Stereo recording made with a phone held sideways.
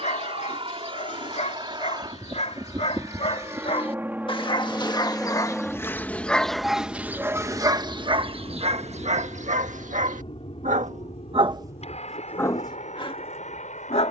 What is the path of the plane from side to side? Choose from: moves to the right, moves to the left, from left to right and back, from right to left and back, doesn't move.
moves to the left.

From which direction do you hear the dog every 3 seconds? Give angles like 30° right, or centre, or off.
50° left, 30° left, 20° right, 50° right, 30° left.